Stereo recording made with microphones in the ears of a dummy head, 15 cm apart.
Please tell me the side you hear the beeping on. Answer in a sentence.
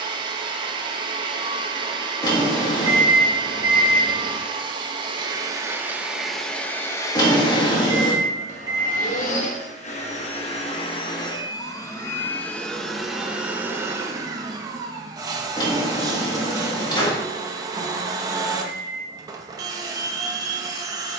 You can hear the beeping on the right.